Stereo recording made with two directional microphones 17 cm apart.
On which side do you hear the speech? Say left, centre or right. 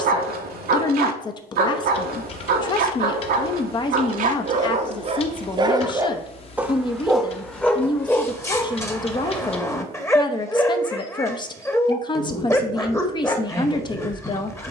left.